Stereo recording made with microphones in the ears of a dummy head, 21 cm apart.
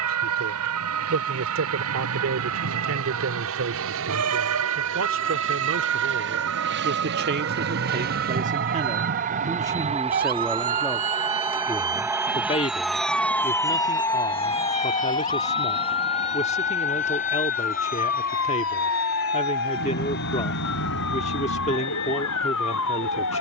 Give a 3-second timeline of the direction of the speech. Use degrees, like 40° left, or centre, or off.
60° right, 60° right, 40° right, centre, 30° left, 30° left, 30° left, 30° left.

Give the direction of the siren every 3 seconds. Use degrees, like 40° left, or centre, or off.
80° right, 70° right, 60° right, 40° right, 10° left, 50° left, 60° left, 70° left.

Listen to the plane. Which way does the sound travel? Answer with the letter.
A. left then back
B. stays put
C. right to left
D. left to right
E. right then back
C.